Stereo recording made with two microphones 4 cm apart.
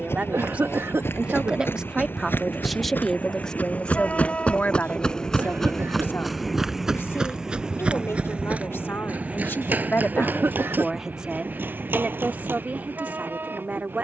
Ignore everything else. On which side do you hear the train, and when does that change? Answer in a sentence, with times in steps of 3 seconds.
You can hear the train on the left from 0 s, in the centre from 6 s and on the right from 9 s.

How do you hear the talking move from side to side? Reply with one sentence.
You can hear the talking move from right to left and back again.